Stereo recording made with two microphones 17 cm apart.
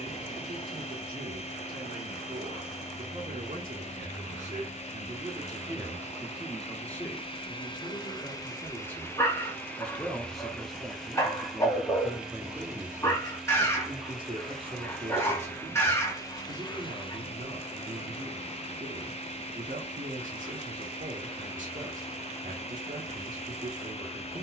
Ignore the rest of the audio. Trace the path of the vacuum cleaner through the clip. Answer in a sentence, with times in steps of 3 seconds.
In this clip you hear the vacuum cleaner on the left from 0 s, in the centre from 9 s and on the left from 15 s.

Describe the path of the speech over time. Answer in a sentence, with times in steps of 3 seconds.
In this clip you hear the speech on the right from 0 s, in the centre from 6 s and on the right from 12 s.